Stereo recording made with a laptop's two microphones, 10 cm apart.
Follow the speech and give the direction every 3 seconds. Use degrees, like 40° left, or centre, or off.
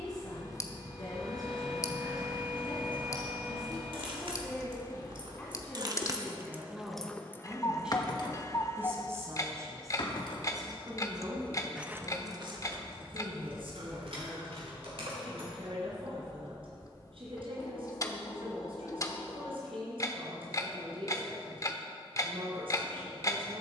40° left, 30° left, centre, 40° right, 70° right, 70° right, 70° right, 70° right.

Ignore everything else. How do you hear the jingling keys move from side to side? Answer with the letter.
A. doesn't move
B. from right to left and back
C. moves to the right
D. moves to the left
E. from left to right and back
B.